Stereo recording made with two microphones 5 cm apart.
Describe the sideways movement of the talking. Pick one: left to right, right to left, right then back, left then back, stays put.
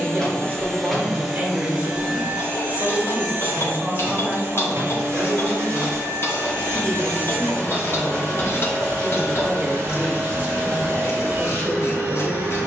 stays put.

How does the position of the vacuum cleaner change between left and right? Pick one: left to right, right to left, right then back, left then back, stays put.
left to right.